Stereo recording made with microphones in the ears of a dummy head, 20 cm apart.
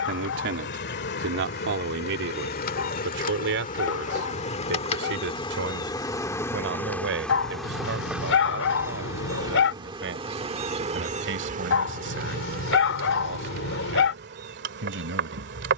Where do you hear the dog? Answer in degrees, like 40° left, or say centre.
60° left.